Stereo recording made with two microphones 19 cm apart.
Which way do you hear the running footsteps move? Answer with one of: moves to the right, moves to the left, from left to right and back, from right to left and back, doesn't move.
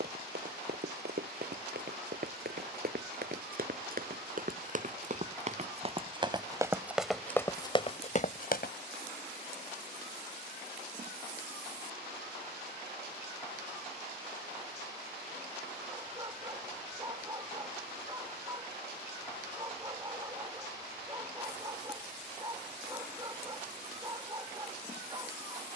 moves to the left.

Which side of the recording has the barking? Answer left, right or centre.
right.